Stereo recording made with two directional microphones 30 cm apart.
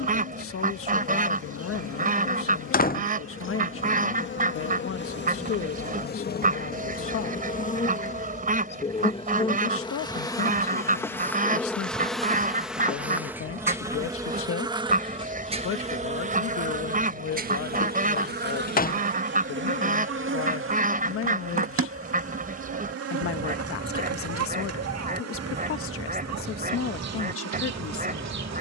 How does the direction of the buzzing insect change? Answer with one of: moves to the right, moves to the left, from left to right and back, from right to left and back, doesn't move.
moves to the right.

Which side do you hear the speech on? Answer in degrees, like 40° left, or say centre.
50° left.